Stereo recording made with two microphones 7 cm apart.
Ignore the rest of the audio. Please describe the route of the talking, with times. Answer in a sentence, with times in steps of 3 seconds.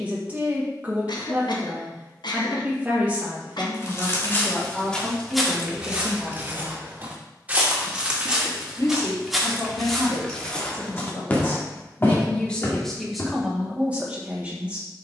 You can hear the talking on the right from 0 s, in the centre from 3 s, on the left from 6 s and in the centre from 12 s.